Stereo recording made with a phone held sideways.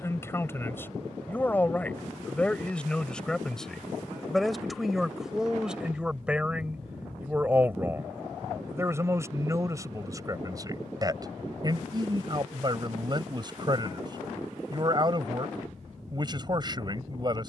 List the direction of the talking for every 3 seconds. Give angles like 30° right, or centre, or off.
10° left, centre, 10° right, 30° right, 30° right, 30° right.